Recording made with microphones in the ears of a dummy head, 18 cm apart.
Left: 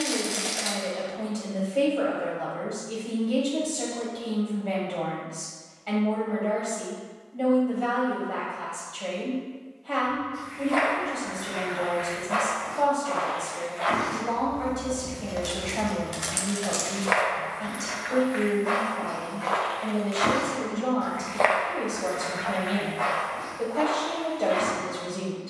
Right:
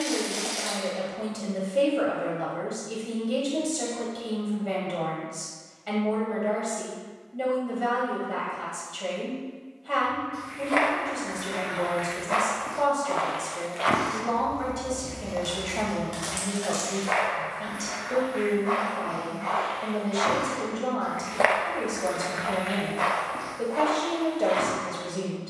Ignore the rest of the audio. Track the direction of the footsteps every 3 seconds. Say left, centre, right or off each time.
off, off, off, right, right, left, left, right, right.